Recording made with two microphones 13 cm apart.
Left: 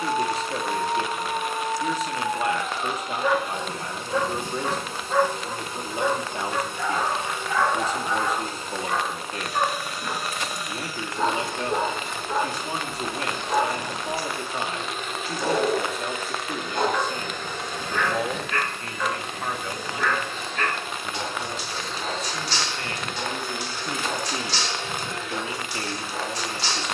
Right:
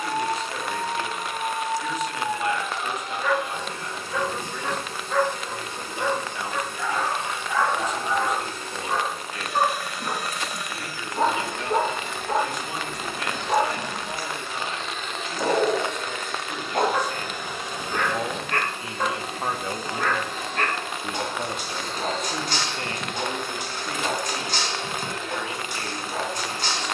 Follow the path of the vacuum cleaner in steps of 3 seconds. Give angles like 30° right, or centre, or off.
20° left, 20° left, 20° left, 20° left, 20° left, centre, 30° right, 40° right, 40° right.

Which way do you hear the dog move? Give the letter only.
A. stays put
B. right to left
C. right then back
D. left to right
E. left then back
D.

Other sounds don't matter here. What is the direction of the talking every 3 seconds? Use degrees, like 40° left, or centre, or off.
30° left, 30° left, 30° left, 30° left, 30° left, 30° left, 20° right, 40° right, 30° left.